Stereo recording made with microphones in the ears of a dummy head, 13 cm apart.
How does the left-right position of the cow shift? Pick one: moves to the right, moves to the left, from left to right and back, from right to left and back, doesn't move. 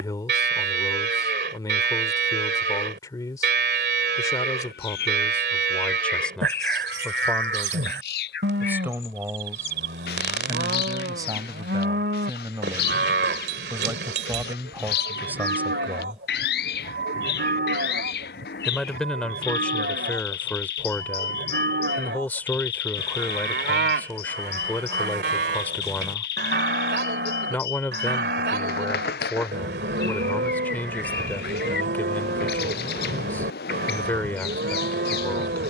doesn't move.